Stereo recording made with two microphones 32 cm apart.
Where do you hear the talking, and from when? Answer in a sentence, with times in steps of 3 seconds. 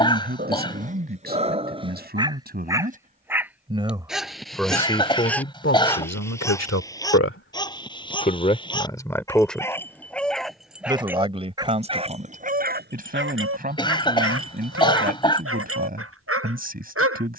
In this clip you hear the talking on the right from 0 s, in the centre from 3 s, on the left from 6 s, in the centre from 9 s and on the right from 12 s.